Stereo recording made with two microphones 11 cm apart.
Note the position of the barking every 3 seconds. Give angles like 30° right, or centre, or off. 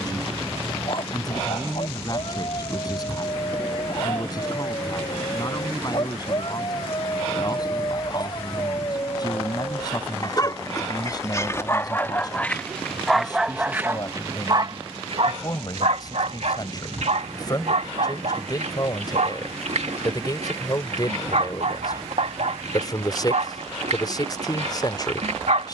50° left, 50° left, 50° left, 30° left, 10° right, 70° right, 80° right, 80° right, 80° right.